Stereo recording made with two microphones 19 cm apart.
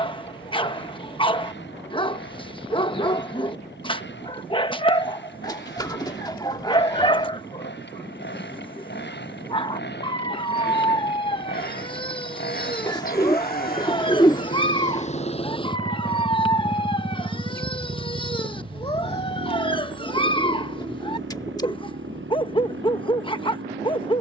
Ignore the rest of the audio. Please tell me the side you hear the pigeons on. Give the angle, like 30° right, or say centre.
20° left.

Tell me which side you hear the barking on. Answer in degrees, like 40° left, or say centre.
30° left.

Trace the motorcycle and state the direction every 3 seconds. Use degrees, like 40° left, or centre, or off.
80° left, 70° left, 70° left, 70° left, 50° left, centre, 60° right, 80° right.